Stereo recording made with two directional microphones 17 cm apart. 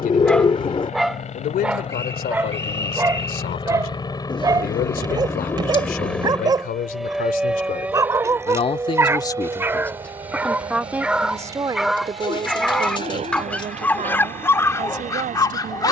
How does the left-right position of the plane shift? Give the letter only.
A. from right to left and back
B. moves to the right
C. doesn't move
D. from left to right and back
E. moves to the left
B.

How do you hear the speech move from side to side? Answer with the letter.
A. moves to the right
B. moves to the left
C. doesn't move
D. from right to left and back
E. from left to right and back
A.